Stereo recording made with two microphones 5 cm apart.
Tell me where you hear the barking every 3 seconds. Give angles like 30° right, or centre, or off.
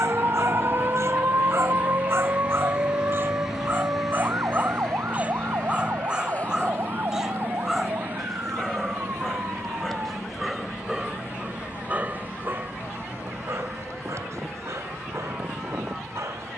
60° right, 30° right, 10° right, 10° right, 60° right, 70° right.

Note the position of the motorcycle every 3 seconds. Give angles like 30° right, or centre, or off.
30° right, 10° left, 40° left, 50° left, 60° left, 60° left.